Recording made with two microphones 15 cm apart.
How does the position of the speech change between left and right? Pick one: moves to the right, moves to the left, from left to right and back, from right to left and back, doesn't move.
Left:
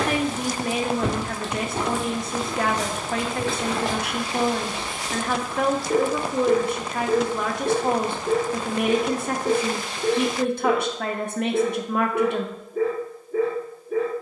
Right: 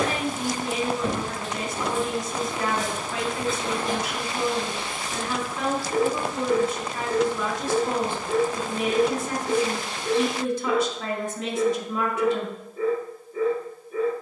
doesn't move.